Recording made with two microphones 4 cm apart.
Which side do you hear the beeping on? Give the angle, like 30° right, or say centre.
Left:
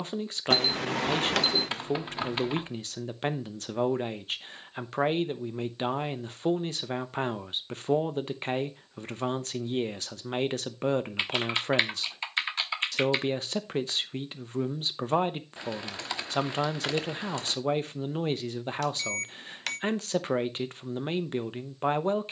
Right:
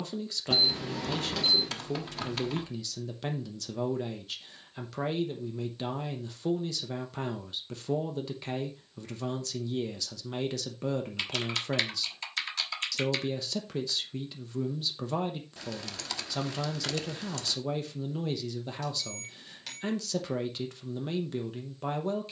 70° left.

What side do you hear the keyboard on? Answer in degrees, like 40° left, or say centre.
30° left.